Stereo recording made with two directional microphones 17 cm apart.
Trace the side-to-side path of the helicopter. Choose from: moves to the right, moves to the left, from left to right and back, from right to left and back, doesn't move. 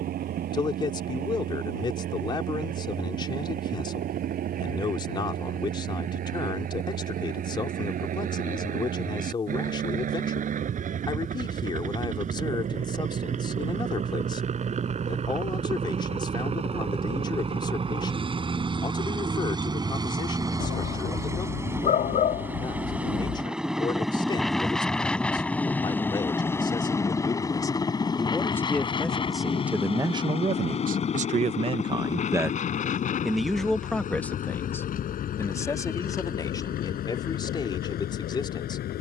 moves to the left.